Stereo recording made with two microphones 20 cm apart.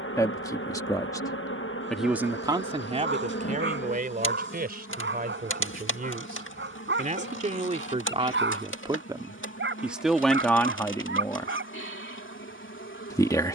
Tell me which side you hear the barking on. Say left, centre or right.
right.